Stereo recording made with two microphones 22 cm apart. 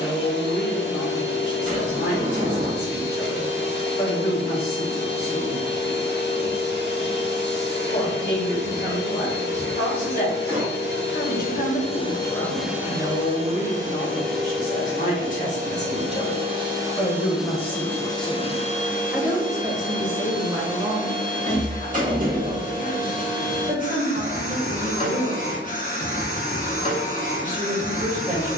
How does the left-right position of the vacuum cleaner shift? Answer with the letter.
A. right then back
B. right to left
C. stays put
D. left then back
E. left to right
A.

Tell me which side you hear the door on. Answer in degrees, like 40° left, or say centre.
40° right.